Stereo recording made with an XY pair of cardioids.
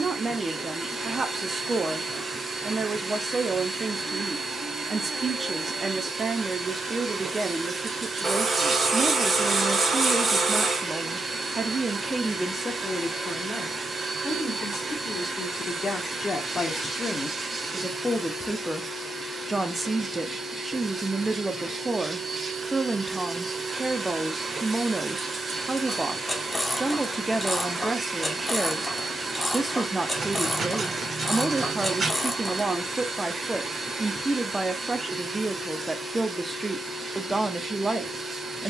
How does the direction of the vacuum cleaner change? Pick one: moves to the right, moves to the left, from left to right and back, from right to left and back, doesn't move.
doesn't move.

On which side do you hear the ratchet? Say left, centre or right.
centre.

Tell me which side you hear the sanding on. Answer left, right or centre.
right.